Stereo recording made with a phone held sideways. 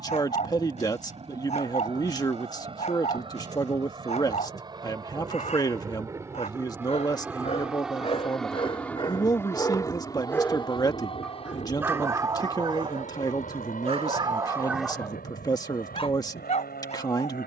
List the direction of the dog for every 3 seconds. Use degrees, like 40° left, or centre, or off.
50° left, 50° left, 50° left, 20° left, 30° right, 50° left.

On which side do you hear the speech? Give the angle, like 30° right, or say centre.
30° left.